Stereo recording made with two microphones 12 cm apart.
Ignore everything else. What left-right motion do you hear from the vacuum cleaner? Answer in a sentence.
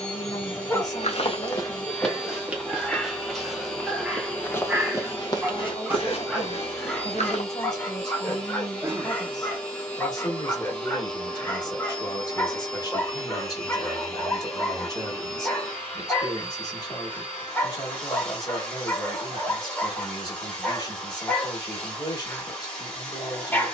You can hear the vacuum cleaner stay put.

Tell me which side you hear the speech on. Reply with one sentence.
You can hear the speech on the left.